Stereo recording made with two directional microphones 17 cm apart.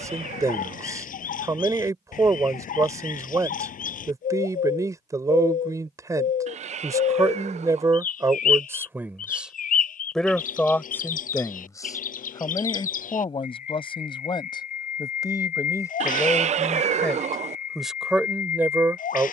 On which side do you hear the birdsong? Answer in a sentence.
You can hear the birdsong on the left.